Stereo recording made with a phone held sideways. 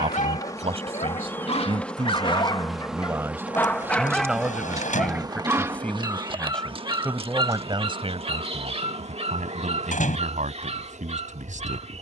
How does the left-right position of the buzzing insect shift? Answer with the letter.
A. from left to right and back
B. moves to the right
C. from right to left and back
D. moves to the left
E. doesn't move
B.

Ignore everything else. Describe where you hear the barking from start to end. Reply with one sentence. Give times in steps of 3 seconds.
In this clip you hear the barking on the left from 0 s, in the centre from 3 s and on the right from 6 s.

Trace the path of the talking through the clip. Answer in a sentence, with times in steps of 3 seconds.
In this clip you hear the talking on the right from 0 s, in the centre from 3 s and on the right from 6 s.